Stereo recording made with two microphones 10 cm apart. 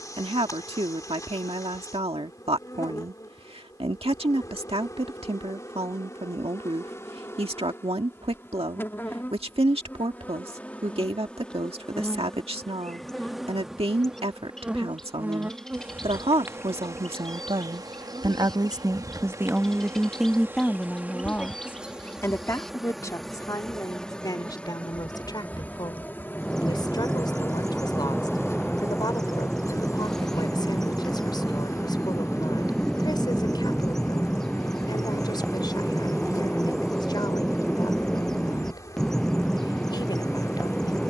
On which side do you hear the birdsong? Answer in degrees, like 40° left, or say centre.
centre.